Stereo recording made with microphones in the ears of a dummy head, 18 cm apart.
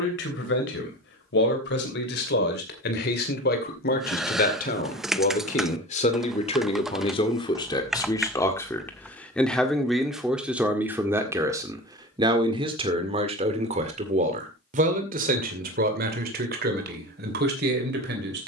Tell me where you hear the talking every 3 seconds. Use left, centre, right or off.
left, left, left, centre, right, right.